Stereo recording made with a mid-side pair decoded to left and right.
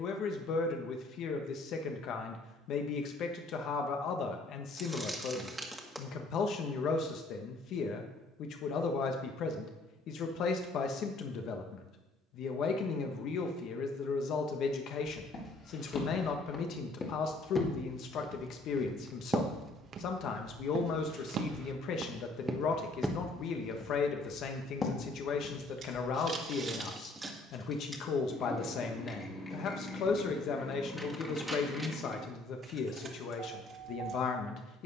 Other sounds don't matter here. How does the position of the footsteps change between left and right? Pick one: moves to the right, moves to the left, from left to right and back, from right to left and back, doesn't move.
from left to right and back.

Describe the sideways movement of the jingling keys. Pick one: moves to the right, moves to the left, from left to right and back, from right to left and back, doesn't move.
from right to left and back.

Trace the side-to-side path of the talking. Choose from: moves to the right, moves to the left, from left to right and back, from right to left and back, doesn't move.
doesn't move.